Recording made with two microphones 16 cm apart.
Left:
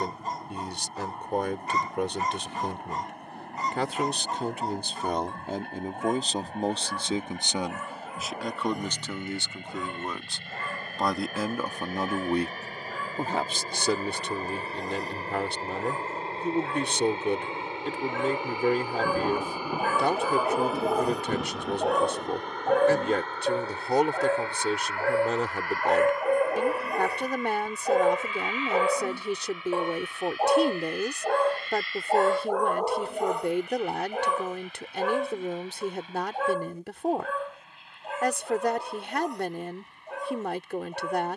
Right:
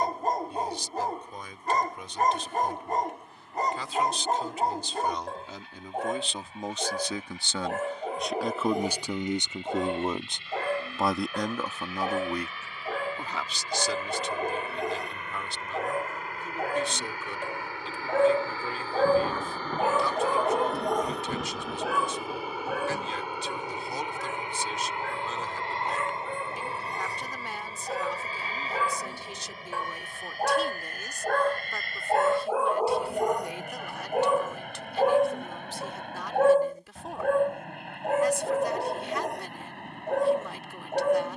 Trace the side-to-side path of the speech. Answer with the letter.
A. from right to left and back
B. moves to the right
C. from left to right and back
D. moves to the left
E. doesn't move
C.